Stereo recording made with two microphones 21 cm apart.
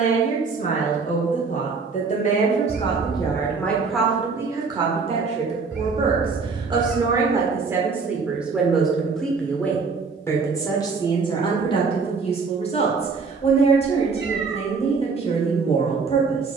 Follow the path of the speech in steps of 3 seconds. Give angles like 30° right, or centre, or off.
30° left, 10° right, 10° right, 20° left, 30° left, 30° left.